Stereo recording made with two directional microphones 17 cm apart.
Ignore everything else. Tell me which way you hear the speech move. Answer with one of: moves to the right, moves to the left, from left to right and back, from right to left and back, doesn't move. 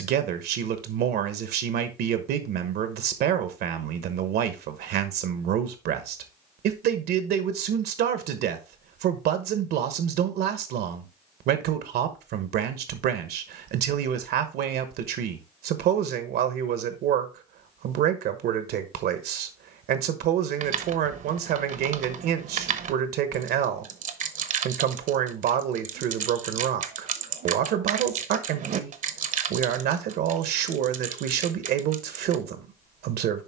doesn't move.